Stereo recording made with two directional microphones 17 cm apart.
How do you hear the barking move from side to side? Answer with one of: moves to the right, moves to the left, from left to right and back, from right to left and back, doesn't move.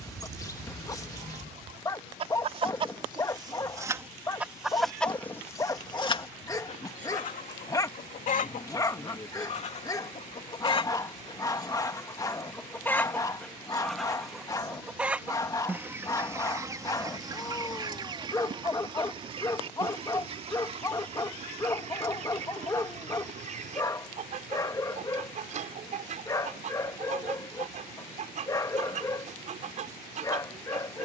doesn't move.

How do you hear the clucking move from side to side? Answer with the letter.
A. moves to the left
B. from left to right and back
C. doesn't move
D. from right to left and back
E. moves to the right
D.